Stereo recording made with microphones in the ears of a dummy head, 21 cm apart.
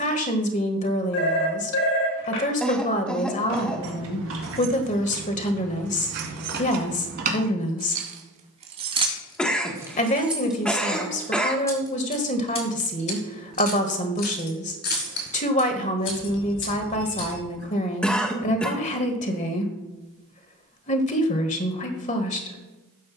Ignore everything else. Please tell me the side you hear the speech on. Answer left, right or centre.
left.